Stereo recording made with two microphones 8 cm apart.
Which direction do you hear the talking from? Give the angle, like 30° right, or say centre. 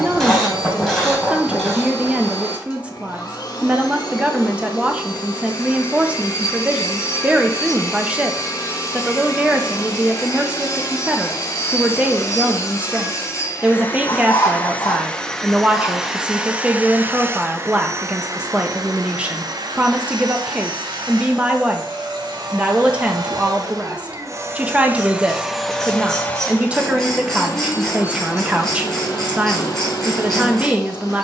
10° right.